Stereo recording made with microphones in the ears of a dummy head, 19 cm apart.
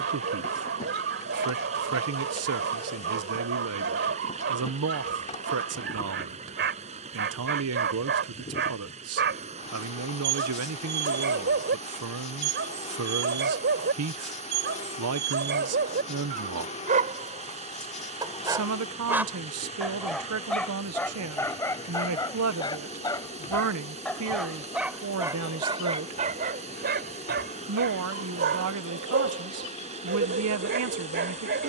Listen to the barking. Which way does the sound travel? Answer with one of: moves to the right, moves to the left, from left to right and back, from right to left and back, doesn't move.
from right to left and back.